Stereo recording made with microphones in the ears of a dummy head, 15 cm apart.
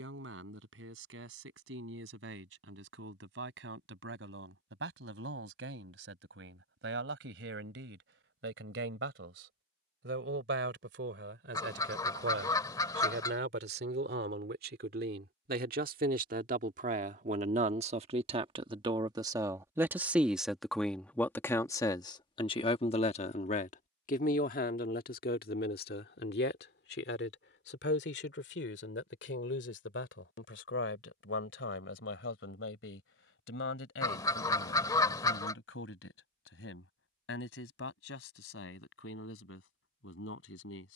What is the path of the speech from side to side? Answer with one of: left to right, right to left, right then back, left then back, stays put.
right to left.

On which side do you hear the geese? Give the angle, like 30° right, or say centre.
20° left.